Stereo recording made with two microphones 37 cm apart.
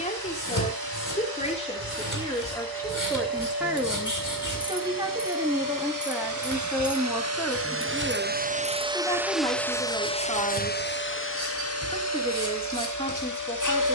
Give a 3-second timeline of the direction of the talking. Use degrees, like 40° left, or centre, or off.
10° left, 10° right, centre, 10° left, 10° left.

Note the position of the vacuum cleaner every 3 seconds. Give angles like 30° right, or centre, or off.
80° right, 70° right, 40° right, 20° left, 50° left.